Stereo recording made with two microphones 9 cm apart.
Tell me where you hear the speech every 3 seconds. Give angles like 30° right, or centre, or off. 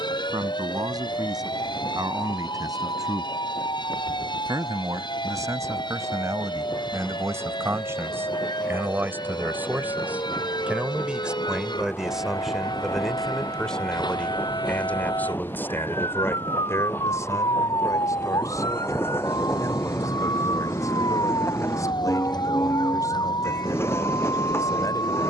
50° right, 40° right, 30° right, 10° right, 10° left, 30° left, 40° left, 40° left, 40° left.